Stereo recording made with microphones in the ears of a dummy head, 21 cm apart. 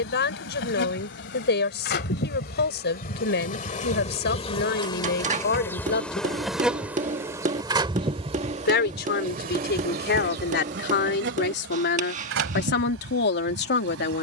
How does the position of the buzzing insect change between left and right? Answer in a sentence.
In this clip you hear the buzzing insect go from the left side to the right.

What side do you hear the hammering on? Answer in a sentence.
In this clip you hear the hammering on the right.